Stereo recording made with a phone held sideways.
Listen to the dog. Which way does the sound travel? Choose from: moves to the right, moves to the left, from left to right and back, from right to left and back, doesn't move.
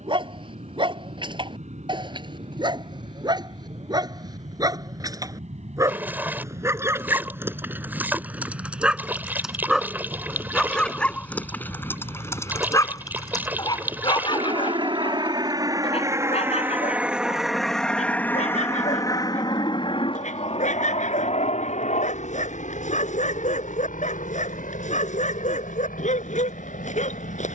moves to the left.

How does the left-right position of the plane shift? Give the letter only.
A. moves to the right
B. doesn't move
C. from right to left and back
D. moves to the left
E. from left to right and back
D.